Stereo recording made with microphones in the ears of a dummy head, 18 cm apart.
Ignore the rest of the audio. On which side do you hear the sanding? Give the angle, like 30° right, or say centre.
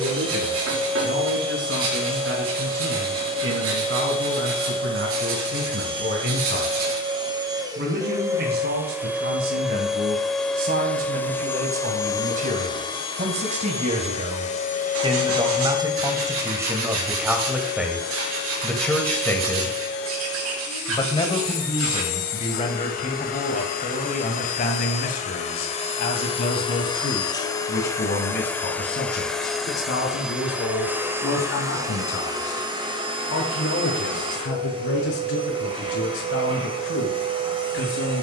70° right.